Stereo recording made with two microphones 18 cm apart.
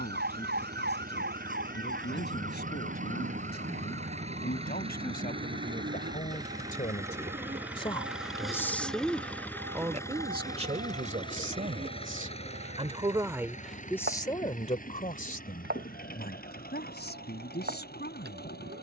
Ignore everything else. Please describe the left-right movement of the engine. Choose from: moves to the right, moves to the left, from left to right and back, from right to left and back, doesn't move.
moves to the left.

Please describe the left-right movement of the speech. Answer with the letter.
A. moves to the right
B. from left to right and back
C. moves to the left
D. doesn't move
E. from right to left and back
B.